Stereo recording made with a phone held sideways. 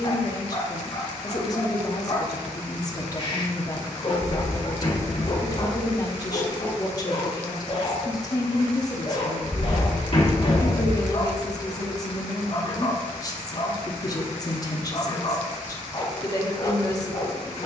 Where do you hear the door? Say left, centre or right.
left.